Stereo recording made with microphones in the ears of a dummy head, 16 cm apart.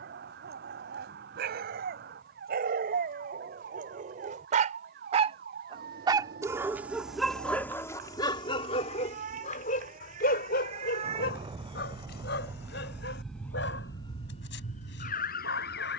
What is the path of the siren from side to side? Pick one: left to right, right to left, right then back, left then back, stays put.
right to left.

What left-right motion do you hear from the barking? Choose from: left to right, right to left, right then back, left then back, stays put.
right to left.